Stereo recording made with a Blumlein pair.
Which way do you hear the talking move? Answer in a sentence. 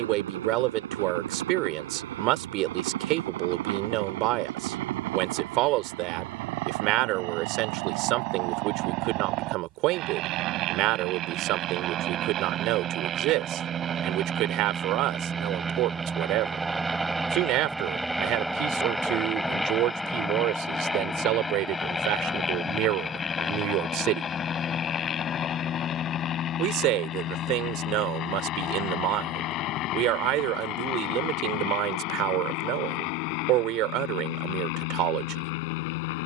In this clip you hear the talking stay put.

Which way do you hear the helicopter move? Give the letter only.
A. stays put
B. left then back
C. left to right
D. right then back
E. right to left
E.